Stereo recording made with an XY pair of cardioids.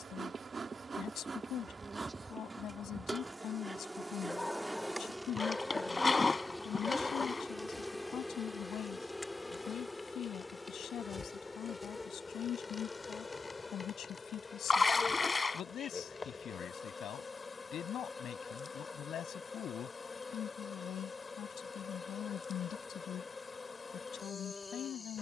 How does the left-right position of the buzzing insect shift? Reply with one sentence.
You can hear the buzzing insect move to the left.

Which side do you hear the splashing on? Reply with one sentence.
In this clip you hear the splashing on the left.